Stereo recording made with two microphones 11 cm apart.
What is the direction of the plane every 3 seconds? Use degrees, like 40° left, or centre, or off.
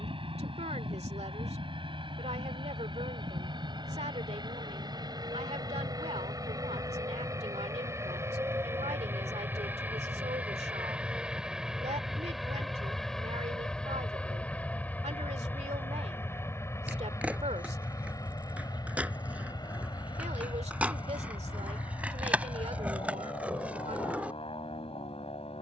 50° right, 40° right, 30° right, 10° right, 10° left, 20° left, 30° left, 40° left, 50° left.